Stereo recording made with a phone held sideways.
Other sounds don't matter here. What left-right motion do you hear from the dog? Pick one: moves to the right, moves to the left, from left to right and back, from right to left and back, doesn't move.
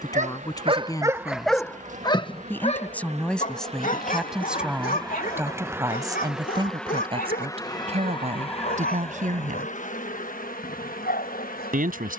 moves to the left.